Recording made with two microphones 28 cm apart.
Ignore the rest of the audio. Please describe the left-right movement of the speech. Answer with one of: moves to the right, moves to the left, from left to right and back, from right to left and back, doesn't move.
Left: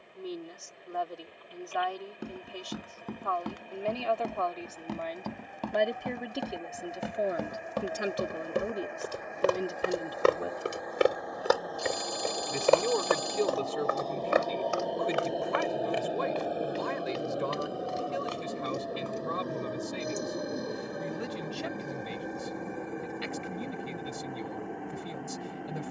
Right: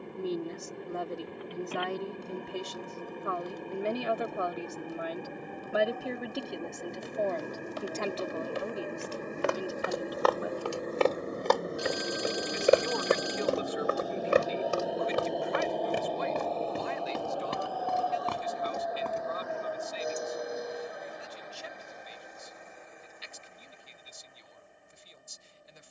moves to the left.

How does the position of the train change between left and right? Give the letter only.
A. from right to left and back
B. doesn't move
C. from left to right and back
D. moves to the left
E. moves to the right
D.